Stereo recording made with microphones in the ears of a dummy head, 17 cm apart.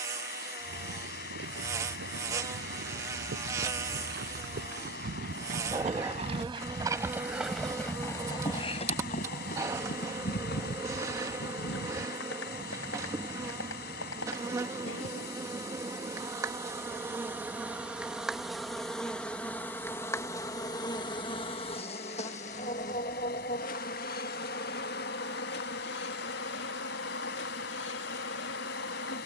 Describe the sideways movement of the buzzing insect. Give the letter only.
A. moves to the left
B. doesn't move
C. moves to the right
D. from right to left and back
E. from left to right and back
A.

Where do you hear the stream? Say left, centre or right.
left.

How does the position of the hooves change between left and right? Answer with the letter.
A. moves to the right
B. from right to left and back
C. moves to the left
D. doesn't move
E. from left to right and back
C.